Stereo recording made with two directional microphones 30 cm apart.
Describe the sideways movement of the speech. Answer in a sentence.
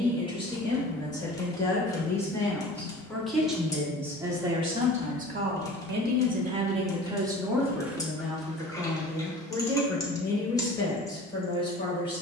In this clip you hear the speech go right and come back.